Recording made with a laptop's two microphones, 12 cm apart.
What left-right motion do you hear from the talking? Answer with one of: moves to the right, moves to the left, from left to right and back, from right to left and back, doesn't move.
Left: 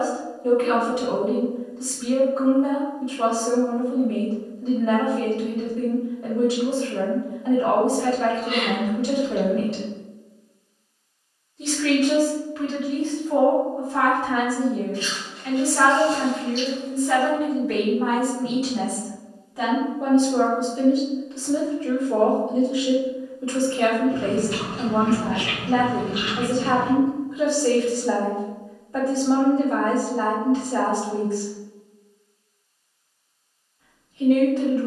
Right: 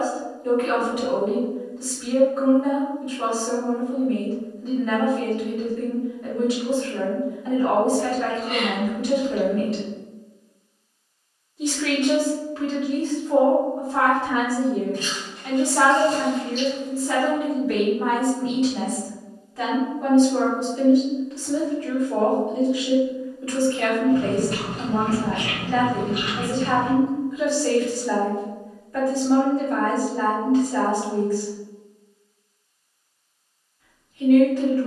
from left to right and back.